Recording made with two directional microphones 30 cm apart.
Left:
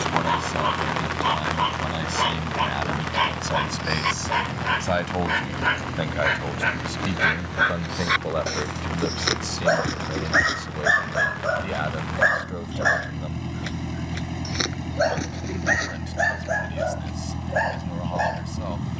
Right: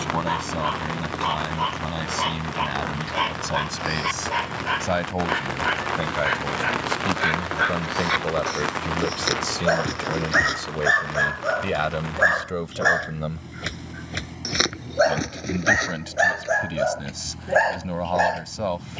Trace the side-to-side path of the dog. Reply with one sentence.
In this clip you hear the dog go from the left side to the right.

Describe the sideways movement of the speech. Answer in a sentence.
In this clip you hear the speech travel towards the right.